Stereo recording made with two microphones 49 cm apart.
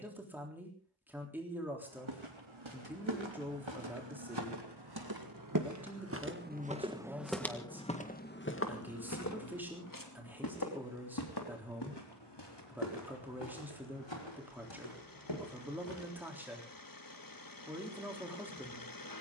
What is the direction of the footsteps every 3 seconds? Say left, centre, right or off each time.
right, right, centre, left, left, left, off.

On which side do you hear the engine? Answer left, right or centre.
left.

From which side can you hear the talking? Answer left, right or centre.
centre.